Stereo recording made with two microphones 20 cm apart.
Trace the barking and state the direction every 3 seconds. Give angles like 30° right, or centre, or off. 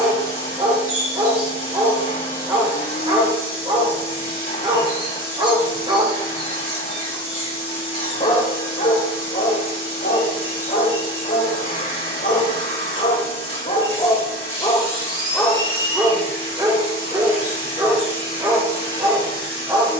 30° right, 30° right, 20° left, 60° left, 40° left, 10° right, 20° right.